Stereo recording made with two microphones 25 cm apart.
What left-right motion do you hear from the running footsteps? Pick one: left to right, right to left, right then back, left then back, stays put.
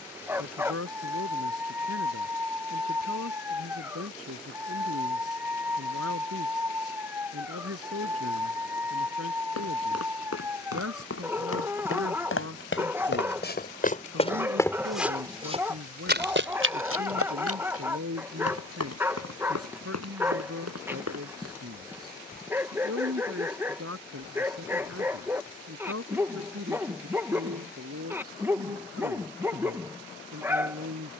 left to right.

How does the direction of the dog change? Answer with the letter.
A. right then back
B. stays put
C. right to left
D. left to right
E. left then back
B.